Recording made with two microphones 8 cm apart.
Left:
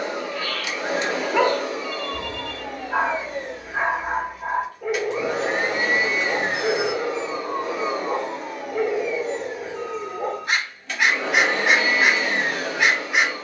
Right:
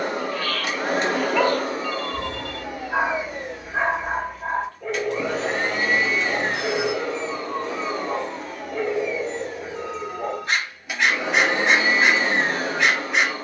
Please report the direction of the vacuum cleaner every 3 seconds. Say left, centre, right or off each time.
right, centre, centre, centre, right.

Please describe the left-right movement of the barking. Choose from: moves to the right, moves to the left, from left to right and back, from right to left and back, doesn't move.
doesn't move.